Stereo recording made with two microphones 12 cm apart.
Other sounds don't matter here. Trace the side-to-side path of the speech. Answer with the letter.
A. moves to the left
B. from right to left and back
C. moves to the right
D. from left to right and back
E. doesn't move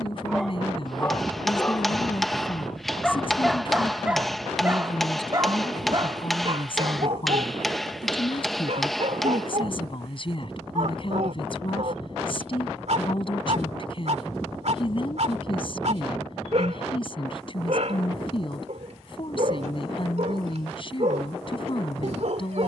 E.